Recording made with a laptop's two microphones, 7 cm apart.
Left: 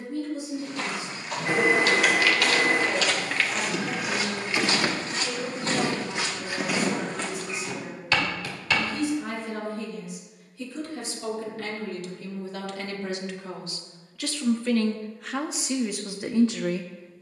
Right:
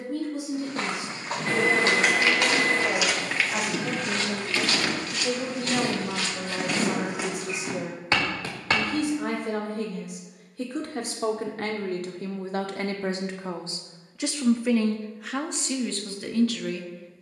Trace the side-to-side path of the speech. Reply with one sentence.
In this clip you hear the speech go from the right side to the left.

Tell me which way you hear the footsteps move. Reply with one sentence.
In this clip you hear the footsteps go left and come back.